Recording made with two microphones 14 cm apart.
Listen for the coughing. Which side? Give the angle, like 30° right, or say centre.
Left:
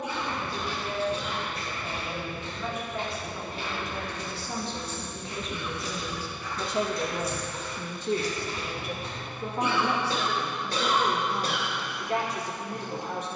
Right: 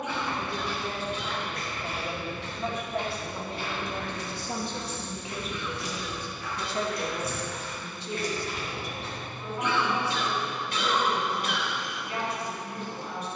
40° left.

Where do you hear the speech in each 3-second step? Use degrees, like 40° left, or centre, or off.
40° right, 20° right, 40° left, 80° left, 80° left.